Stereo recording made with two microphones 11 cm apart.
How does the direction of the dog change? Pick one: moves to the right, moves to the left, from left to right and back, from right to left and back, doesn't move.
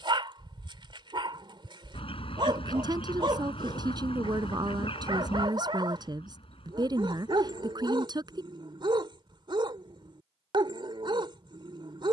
doesn't move.